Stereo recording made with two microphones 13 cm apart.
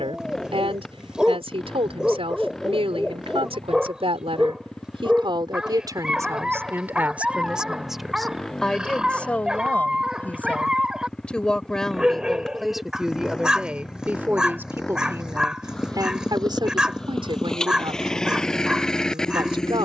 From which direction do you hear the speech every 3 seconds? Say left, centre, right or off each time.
right, right, centre, centre, centre, right, right.